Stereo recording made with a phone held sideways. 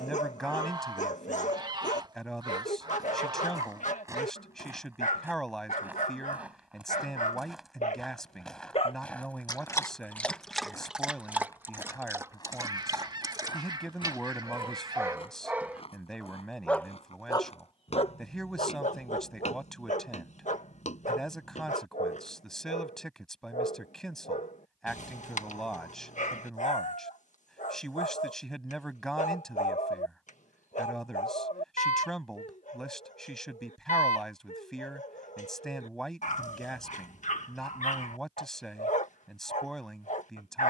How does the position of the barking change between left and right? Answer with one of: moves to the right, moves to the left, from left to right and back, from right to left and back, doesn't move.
from left to right and back.